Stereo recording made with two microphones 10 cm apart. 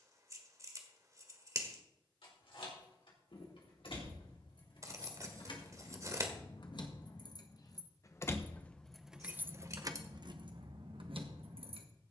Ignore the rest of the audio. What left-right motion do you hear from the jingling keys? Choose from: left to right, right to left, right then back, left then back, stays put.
left to right.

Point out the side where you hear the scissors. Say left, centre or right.
right.